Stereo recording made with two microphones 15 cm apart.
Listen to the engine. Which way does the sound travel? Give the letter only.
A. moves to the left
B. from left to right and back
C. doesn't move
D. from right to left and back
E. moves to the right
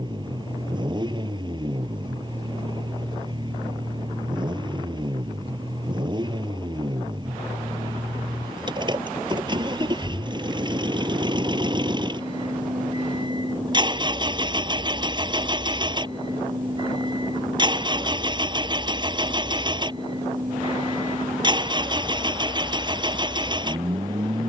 C.